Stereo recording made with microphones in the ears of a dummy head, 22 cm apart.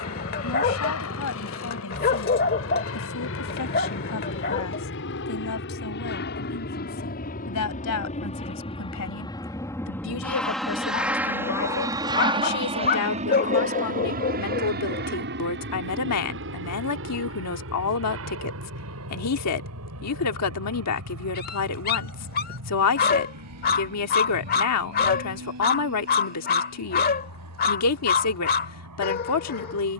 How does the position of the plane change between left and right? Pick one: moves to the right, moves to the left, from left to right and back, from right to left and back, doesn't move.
moves to the right.